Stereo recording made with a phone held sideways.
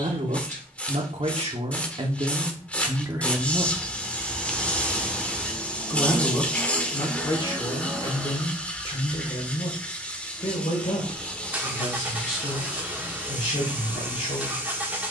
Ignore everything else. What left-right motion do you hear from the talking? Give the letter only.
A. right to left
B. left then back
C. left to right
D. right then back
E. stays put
A.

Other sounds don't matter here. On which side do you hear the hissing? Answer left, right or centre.
centre.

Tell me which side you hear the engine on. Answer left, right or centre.
centre.